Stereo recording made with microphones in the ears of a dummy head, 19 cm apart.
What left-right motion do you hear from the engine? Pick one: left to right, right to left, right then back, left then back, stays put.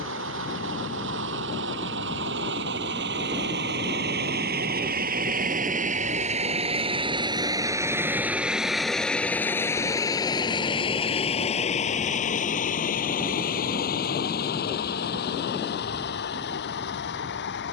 right to left.